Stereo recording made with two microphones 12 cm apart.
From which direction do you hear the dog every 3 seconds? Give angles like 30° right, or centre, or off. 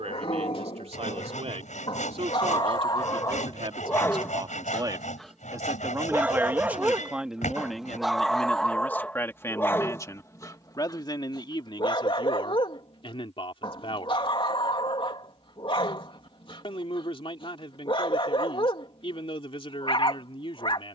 50° left, 20° left, 10° right, 20° left, 40° left, 40° left, 40° left.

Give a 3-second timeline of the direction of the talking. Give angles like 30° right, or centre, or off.
60° right, 40° right, centre, 30° left, 50° left, 50° left, 50° left.